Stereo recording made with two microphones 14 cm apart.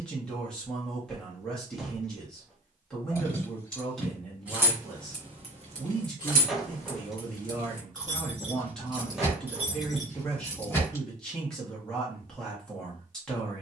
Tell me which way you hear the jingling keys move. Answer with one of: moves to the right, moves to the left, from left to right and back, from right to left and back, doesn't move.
from left to right and back.